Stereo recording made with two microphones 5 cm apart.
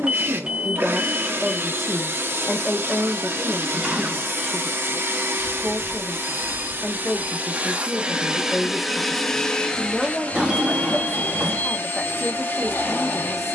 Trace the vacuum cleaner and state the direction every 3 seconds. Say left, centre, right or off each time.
right, right, right, left, left.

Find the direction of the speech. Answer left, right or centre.
centre.